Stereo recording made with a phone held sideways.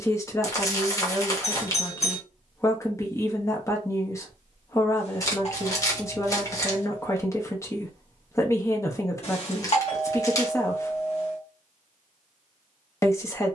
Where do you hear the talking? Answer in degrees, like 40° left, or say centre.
20° left.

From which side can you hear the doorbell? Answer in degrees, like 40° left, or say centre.
50° left.